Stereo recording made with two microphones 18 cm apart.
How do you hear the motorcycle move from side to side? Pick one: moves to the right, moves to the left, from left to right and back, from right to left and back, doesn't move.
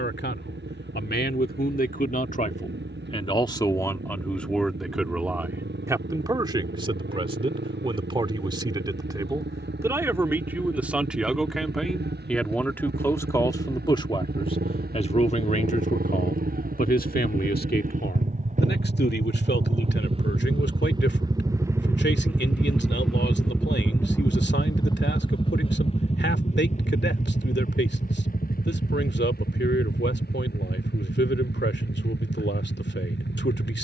moves to the left.